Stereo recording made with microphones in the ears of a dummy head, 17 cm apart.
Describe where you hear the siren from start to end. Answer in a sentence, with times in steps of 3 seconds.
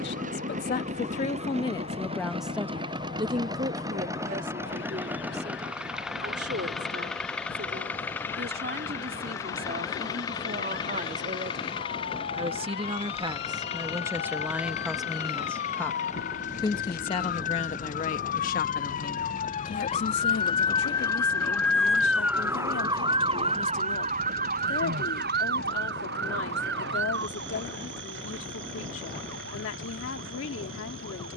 In this clip you hear the siren on the left from 0 s, in the centre from 21 s and on the right from 24 s.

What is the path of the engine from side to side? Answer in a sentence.
In this clip you hear the engine go from the right side to the left.